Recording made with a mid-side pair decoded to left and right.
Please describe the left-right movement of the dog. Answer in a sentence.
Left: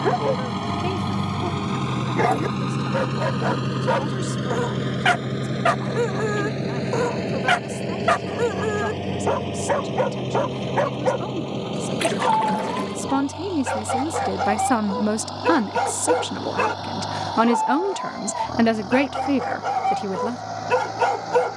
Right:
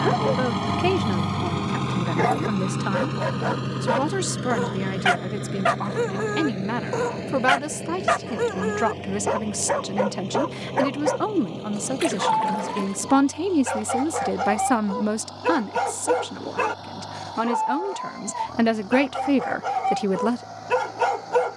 You can hear the dog stay in one place.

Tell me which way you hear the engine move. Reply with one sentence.
You can hear the engine move to the left.